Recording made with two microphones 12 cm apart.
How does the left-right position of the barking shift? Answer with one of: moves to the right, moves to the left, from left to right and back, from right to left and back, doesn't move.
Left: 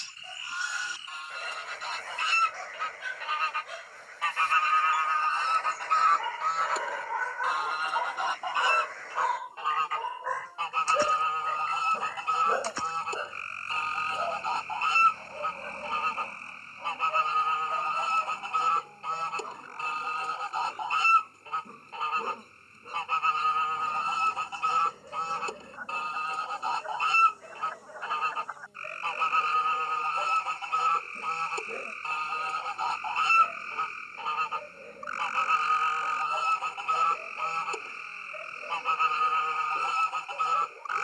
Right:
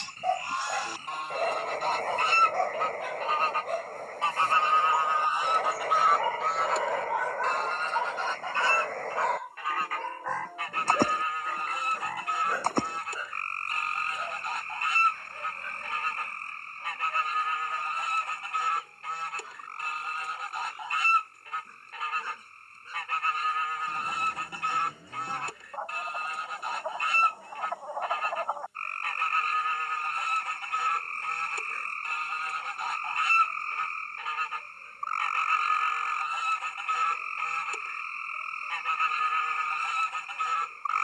moves to the left.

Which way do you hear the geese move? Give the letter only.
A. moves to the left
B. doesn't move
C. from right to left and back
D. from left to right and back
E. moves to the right
A.